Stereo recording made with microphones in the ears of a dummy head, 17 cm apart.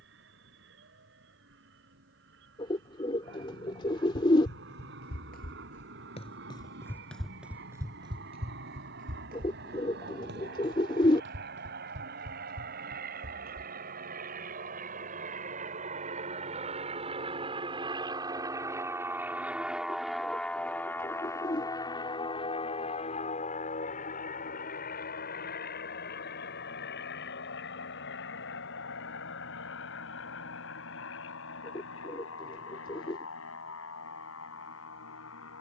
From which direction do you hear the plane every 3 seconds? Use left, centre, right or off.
right, right, right, right, right, right, centre, left, left, left, left, left.